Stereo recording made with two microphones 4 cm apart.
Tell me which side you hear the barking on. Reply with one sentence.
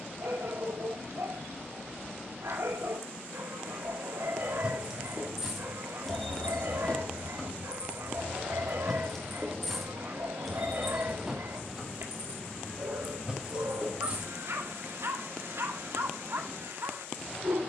In this clip you hear the barking on the right.